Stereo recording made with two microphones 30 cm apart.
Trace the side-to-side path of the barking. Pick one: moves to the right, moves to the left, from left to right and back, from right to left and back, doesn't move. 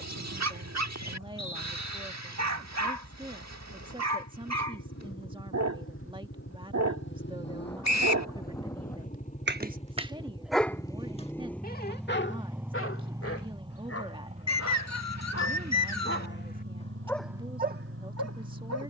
from right to left and back.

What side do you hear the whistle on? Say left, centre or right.
left.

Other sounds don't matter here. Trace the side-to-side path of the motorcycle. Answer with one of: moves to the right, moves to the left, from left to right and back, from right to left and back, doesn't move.
moves to the right.